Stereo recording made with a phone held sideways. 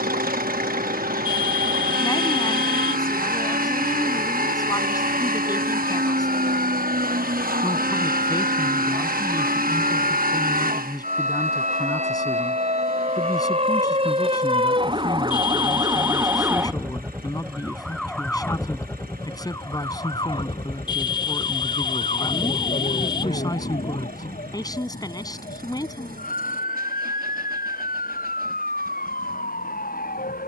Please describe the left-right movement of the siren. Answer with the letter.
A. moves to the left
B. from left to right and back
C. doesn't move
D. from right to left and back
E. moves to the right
A.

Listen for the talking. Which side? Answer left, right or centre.
left.